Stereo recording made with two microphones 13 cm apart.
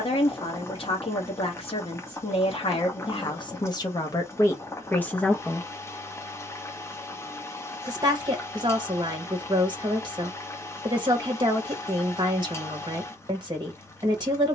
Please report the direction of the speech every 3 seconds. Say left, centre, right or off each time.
left, left, right, right, right.